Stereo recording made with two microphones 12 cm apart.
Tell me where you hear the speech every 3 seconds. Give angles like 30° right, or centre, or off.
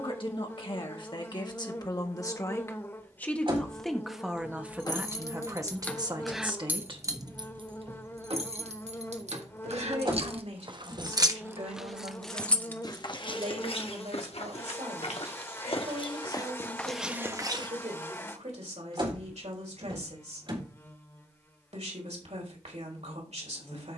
40° left, 10° right, 40° right, 70° right, 70° right, 70° right, 70° right, 70° right.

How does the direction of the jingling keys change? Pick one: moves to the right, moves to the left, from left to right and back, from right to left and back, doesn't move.
from left to right and back.